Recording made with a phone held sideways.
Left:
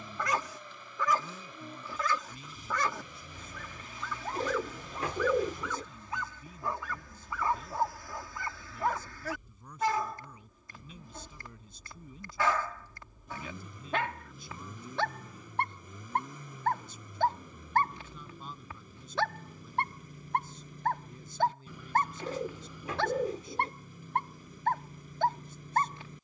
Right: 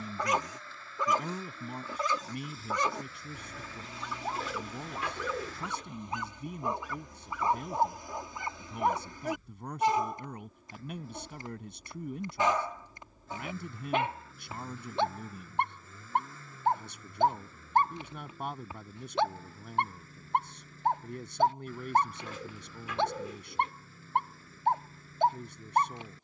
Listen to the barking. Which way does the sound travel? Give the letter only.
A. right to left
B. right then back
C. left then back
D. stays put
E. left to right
D.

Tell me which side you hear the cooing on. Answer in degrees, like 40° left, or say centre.
40° left.